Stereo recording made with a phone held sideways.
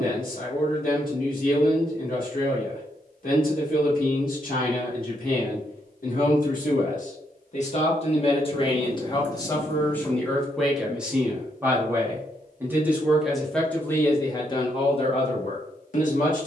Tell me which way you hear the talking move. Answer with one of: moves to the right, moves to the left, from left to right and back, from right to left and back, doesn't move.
from left to right and back.